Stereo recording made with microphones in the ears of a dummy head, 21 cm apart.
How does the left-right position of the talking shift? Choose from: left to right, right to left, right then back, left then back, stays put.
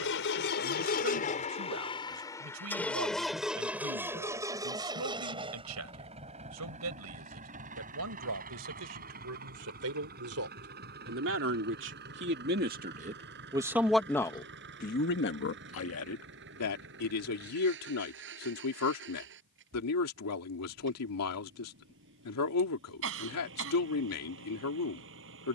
right to left.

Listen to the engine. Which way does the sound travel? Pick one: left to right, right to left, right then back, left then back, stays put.
left to right.